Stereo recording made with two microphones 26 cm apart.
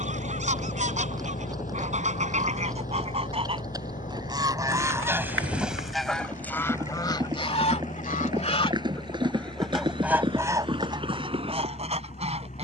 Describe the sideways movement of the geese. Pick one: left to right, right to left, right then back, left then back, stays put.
left then back.